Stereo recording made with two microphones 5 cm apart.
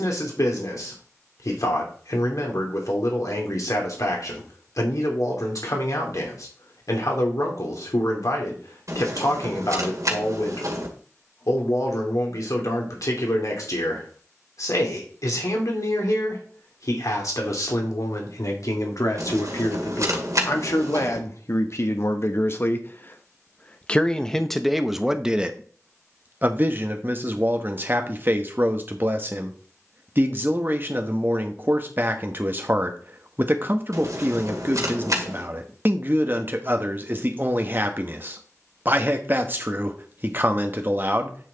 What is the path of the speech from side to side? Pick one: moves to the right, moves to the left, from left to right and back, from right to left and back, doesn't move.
moves to the right.